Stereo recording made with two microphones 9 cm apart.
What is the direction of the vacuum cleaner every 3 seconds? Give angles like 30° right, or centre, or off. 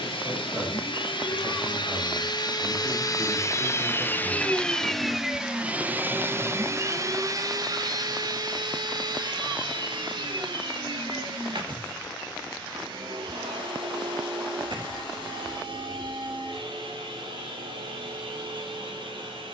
60° left, 10° left, 40° right, 60° right, 70° right, 70° right, 70° right.